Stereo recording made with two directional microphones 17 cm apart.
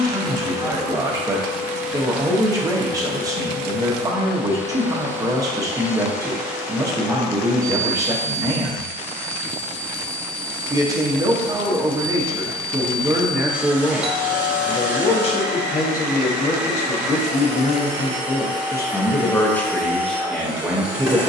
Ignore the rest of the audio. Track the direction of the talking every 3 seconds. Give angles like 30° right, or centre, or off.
20° right, 20° right, 20° right, 20° right, centre, 40° left, 10° left.